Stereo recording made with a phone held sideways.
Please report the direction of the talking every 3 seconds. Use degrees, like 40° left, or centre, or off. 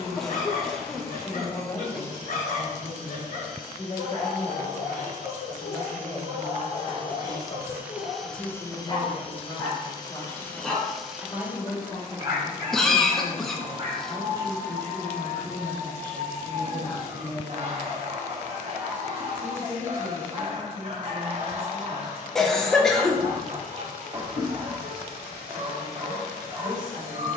30° left, 30° left, 30° left, 30° left, 20° left, 10° left, 10° right, 10° right, 10° right.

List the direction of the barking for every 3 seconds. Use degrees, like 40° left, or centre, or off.
60° left, 60° left, 50° left, 10° left, 30° right, 40° right, 40° right, 40° right, 40° right.